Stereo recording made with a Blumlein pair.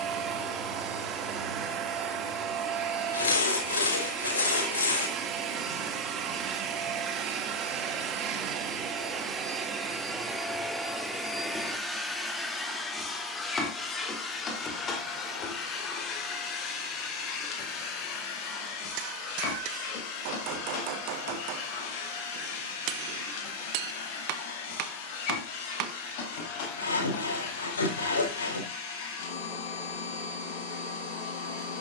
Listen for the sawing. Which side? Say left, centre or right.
left.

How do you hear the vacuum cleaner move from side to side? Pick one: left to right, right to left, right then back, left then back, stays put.
right to left.